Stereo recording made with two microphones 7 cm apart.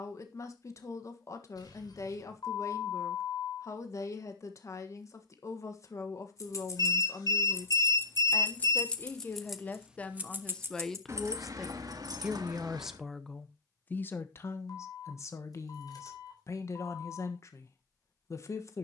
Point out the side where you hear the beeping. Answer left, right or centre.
left.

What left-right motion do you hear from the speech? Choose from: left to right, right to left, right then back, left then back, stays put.
right then back.